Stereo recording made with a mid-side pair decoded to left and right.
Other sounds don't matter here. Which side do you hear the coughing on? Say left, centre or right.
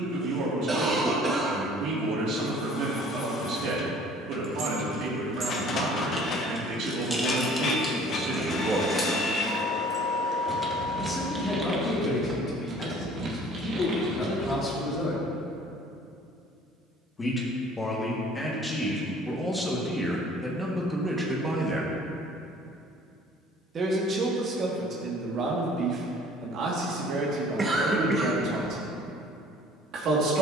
right.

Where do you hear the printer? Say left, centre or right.
left.